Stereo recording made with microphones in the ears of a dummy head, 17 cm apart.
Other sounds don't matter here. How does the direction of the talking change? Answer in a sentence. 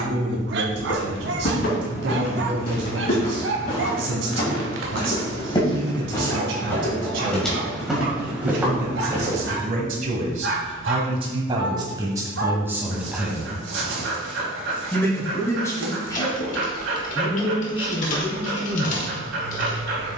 You can hear the talking move from right to left.